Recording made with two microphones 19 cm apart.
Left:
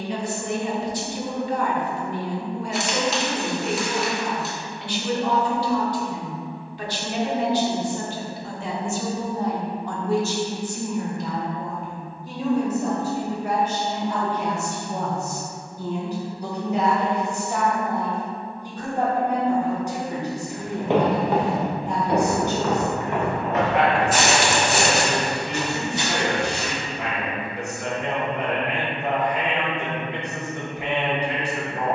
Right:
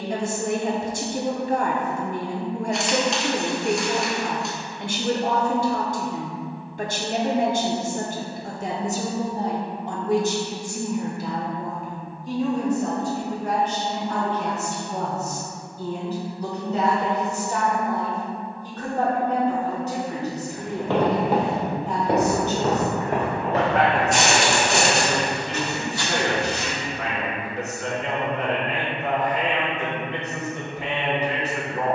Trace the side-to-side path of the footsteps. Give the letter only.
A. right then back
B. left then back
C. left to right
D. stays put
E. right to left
A.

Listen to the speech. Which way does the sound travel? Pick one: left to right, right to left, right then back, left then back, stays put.
right to left.